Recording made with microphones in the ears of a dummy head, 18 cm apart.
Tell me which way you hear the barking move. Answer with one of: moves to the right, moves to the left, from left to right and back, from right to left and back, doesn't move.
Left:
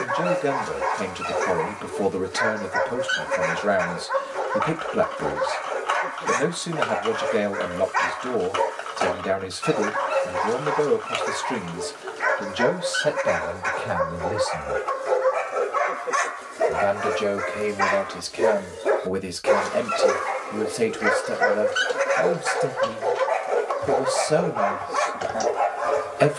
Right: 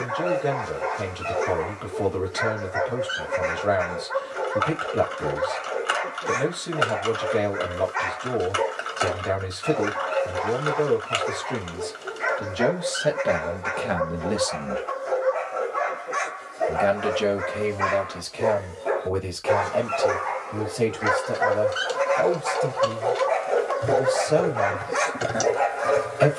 moves to the right.